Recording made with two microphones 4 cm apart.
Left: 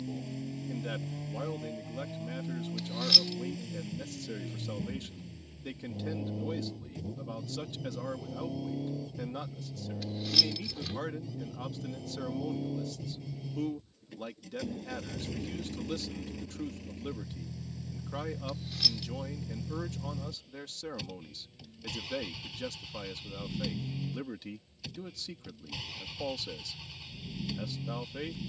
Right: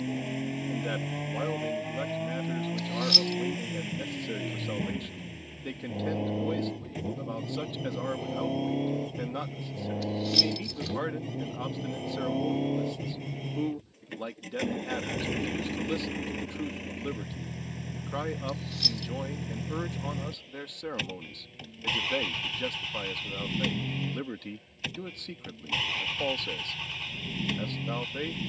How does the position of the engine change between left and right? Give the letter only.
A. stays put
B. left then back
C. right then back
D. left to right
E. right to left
A.